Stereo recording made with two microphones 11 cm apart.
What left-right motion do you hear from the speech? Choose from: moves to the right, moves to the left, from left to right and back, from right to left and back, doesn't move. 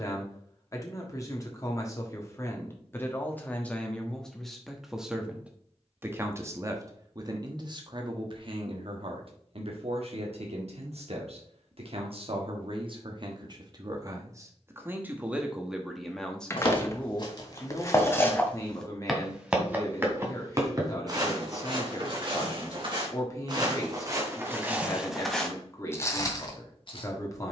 from left to right and back.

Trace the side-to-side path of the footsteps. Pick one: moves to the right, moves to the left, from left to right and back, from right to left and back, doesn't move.
from left to right and back.